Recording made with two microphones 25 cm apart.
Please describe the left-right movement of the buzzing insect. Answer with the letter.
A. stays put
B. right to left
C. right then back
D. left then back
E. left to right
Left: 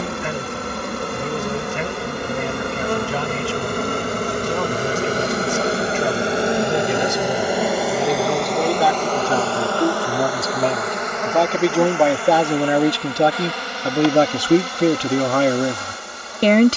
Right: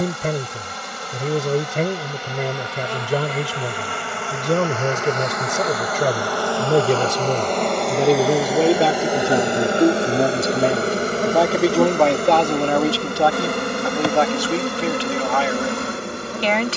E.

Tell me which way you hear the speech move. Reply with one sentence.
You can hear the speech travel towards the left.